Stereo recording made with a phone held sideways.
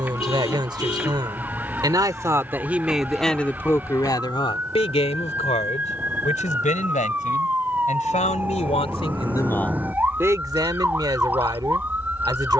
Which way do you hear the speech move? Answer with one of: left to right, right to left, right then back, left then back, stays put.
left then back.